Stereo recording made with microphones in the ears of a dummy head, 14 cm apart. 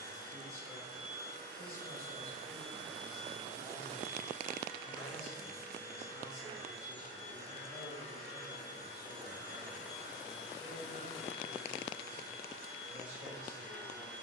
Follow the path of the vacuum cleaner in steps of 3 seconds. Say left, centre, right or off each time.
right, centre, left, left, left.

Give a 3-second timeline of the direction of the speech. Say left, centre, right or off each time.
left, left, centre, centre, centre.